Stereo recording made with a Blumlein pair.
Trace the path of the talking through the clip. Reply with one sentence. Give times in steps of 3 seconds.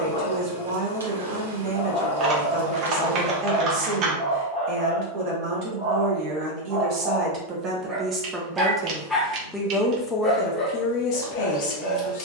You can hear the talking on the right from 0 s and on the left from 9 s.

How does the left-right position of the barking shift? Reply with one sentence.
In this clip you hear the barking move from left to right and back again.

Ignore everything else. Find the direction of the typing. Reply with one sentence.
In this clip you hear the typing on the right.